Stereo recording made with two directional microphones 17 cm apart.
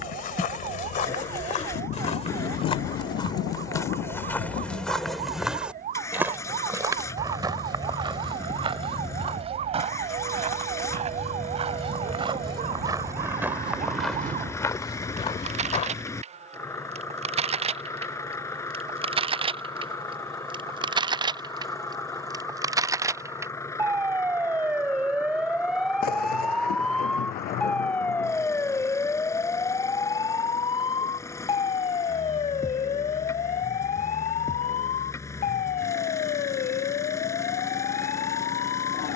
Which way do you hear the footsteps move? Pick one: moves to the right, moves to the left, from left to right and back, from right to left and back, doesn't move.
from left to right and back.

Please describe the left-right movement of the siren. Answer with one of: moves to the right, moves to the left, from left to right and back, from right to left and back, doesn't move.
moves to the left.